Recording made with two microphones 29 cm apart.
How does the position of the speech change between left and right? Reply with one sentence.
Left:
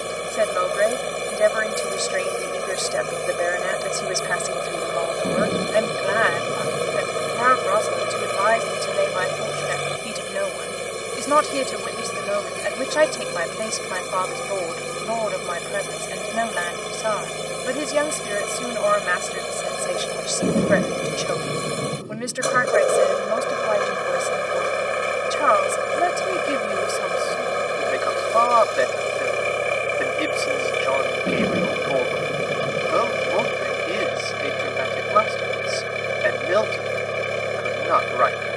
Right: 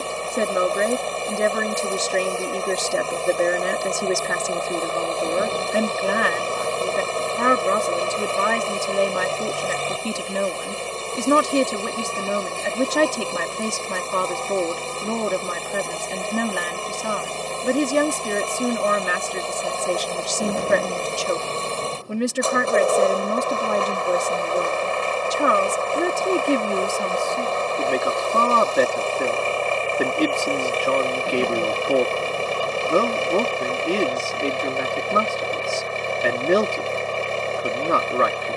In this clip you hear the speech stay put.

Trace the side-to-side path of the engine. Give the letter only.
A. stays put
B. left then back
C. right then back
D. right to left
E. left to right
A.